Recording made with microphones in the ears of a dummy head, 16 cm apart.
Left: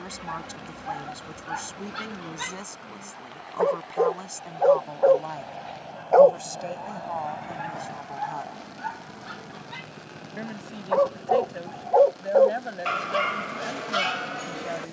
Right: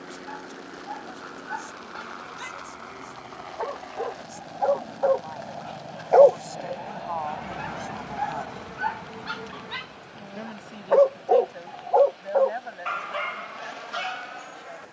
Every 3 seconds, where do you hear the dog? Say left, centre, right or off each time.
left, left, right, right, left.